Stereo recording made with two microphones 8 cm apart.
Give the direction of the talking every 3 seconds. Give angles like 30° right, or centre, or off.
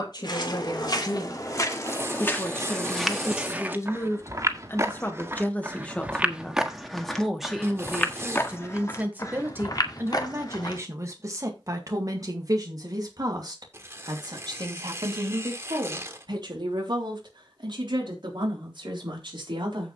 50° left, 30° left, centre, 30° right, 50° right, 60° right, 60° right.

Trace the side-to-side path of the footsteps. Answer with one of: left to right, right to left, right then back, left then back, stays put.
right then back.